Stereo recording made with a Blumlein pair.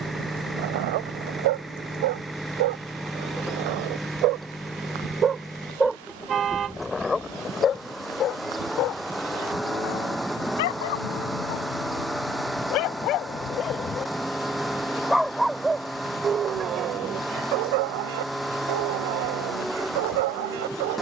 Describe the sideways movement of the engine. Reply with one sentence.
In this clip you hear the engine stay put.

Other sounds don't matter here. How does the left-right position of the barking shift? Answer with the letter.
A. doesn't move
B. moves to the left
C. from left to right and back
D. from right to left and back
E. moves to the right
D.